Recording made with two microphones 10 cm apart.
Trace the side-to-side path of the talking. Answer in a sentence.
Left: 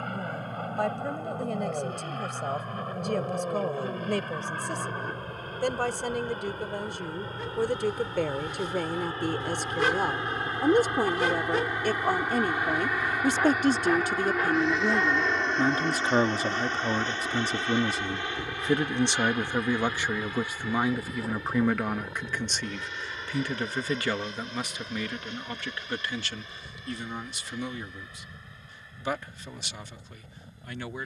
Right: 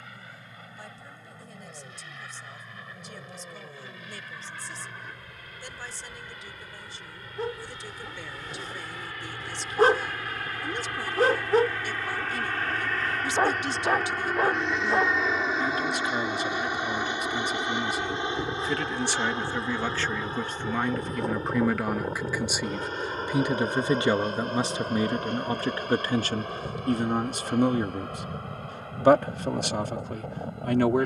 You can hear the talking move from left to right.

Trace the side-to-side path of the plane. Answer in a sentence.
In this clip you hear the plane go from the left side to the right.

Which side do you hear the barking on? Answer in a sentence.
You can hear the barking on the right.